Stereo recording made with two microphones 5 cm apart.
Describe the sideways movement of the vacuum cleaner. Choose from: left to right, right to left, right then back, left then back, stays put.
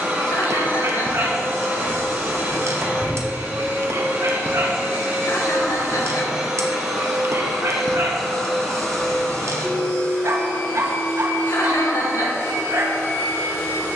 right to left.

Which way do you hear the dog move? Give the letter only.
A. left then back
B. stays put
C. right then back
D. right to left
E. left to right
B.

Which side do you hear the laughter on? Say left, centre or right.
left.